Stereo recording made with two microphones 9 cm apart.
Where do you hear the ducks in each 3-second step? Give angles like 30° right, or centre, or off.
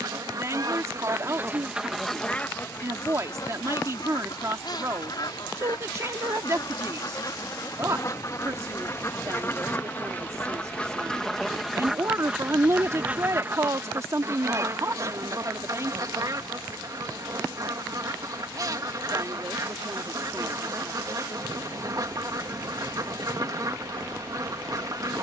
20° right, 50° left, 40° left, 20° left, 20° right, 40° right, 40° right, 40° right, 40° right.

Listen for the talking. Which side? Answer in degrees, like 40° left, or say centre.
40° right.